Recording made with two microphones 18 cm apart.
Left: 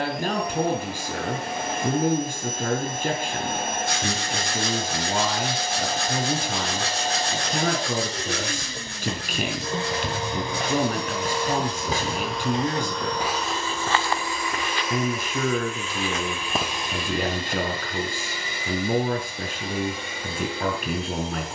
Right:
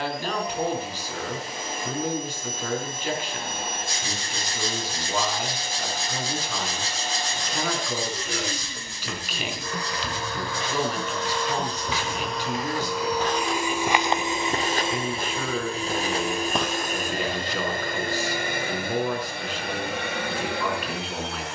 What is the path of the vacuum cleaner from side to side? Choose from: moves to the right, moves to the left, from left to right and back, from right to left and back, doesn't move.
moves to the right.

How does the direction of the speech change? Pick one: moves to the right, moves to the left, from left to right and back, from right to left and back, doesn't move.
doesn't move.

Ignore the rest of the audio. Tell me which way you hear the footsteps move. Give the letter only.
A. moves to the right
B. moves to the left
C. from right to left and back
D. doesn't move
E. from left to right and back
E.